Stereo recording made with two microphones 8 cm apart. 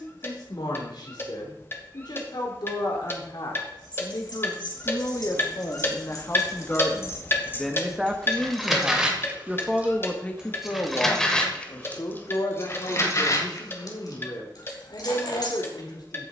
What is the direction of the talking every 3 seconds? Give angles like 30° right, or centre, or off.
70° left, 50° left, 10° left, 20° left, 60° left, 60° left.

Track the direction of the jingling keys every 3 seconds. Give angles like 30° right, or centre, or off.
off, 60° left, 30° left, centre, 50° left, 60° left.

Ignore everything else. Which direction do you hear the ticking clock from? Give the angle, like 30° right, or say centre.
30° left.